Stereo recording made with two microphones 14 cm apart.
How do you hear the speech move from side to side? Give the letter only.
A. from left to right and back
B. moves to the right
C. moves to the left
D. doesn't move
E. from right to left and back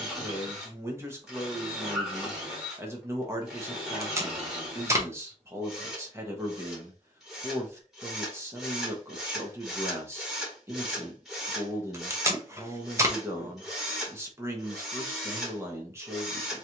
D.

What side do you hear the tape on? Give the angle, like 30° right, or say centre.
20° right.